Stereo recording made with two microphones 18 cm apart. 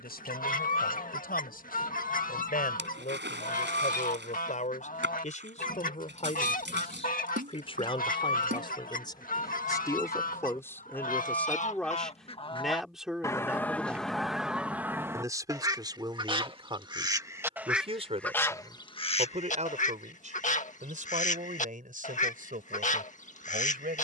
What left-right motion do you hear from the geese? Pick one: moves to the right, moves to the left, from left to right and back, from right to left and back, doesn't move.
from left to right and back.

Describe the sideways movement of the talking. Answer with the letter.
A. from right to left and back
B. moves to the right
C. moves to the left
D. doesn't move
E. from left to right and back
B.